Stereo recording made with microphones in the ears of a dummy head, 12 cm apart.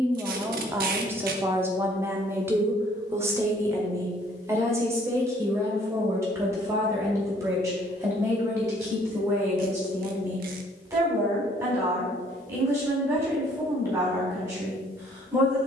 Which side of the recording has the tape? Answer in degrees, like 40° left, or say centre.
70° right.